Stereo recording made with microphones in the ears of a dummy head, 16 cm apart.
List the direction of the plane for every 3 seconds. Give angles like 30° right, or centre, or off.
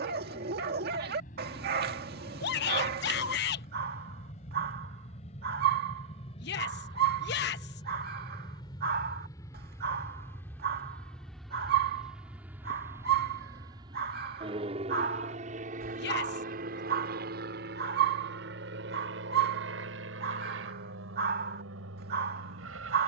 50° left, 40° left, 30° left, 10° left, 20° right, 50° right, 60° right, 70° right.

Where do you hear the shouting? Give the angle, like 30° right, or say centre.
70° left.